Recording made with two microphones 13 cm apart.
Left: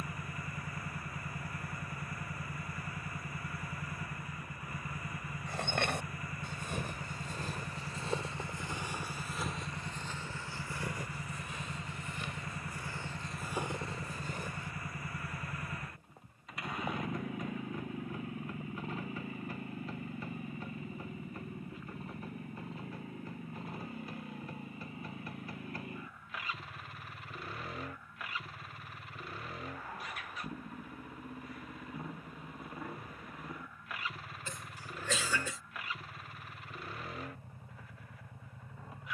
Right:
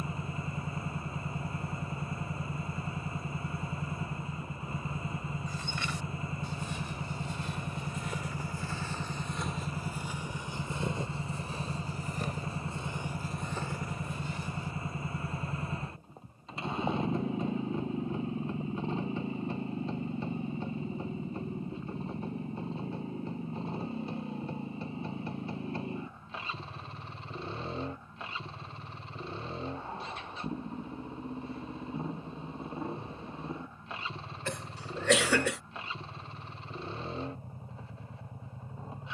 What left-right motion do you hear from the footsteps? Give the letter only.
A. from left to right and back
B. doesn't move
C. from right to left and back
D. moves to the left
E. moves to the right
A.